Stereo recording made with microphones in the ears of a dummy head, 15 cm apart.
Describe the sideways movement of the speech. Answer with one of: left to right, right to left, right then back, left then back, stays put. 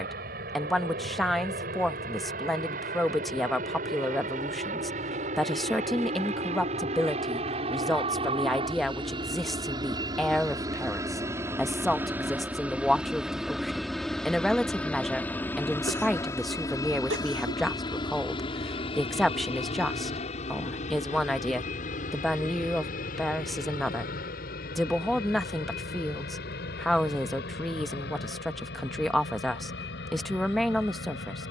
stays put.